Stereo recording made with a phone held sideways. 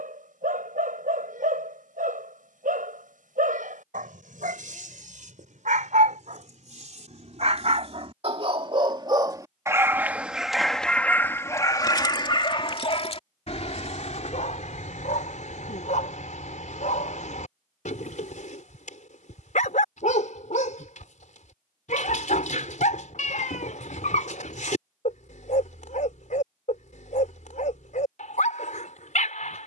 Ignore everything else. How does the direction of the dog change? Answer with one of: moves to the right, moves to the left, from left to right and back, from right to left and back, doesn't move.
moves to the left.